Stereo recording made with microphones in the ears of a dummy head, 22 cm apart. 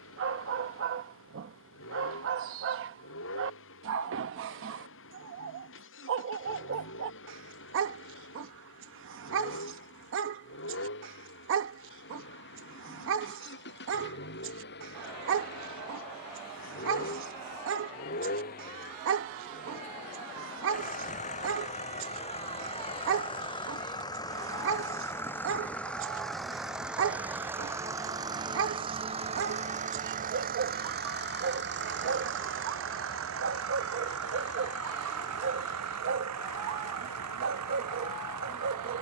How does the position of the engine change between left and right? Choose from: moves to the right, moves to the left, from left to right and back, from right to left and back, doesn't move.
moves to the right.